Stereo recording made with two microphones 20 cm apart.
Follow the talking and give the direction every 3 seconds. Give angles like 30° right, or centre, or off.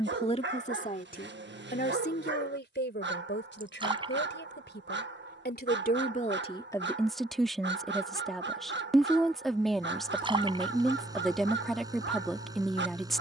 50° left, 60° left, 10° left, centre, centre.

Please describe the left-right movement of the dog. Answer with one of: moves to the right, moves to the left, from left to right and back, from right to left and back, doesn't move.
doesn't move.